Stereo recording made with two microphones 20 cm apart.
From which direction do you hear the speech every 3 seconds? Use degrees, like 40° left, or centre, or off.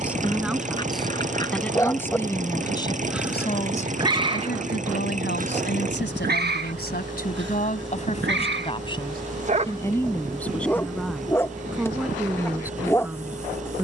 10° left, 50° left, 50° left, 10° left, 10° right.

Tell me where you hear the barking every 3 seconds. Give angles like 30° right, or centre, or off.
20° left, 30° right, 60° right, centre, 10° left.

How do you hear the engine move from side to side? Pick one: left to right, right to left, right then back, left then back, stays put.
stays put.